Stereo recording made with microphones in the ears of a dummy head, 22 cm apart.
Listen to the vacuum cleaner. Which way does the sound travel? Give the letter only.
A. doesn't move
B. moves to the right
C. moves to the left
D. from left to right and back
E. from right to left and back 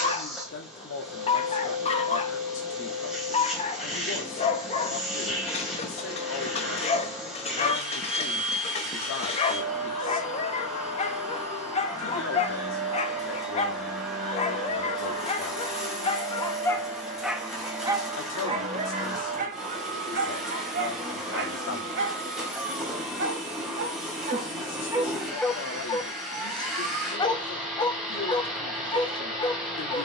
A.